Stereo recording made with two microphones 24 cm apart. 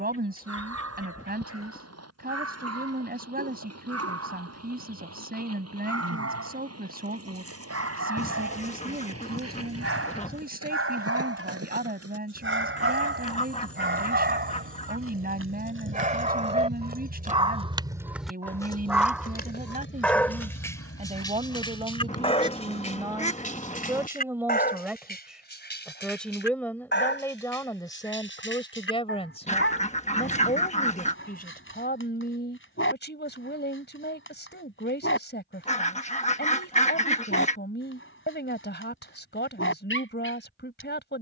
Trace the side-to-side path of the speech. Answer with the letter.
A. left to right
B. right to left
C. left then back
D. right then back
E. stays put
B.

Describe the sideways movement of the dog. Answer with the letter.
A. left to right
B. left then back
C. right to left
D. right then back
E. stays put
C.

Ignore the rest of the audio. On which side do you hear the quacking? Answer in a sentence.
In this clip you hear the quacking on the left.